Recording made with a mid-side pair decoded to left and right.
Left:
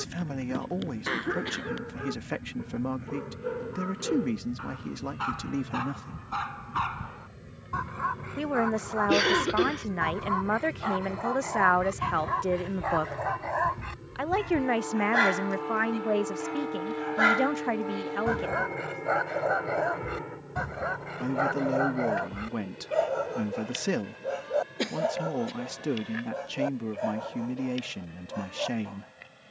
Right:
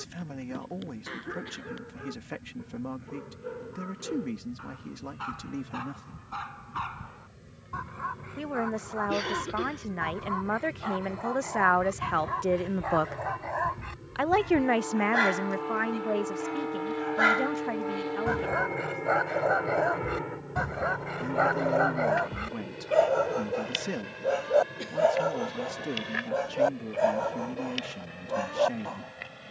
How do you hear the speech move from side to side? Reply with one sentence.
You can hear the speech go right and come back.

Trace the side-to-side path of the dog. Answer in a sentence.
In this clip you hear the dog move to the right.